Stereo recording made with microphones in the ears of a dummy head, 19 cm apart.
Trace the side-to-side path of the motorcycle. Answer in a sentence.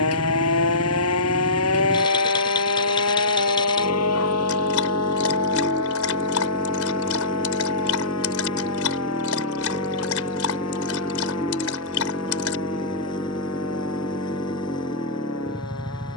You can hear the motorcycle stay put.